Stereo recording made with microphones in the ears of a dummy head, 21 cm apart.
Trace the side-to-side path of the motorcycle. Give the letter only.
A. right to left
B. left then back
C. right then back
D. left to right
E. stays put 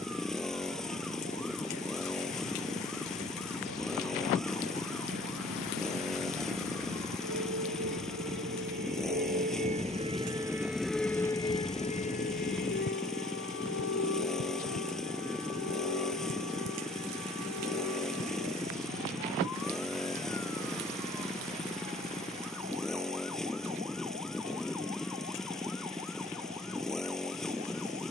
E.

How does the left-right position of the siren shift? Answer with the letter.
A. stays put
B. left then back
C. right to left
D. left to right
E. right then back
C.